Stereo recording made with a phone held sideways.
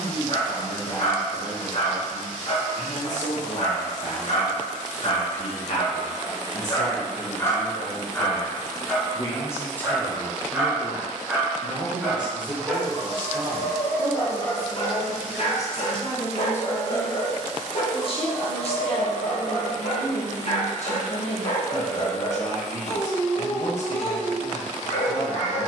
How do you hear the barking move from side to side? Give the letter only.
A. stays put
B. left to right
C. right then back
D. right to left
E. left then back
C.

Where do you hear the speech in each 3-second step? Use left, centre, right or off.
left, left, left, centre, right, centre, left, left, left.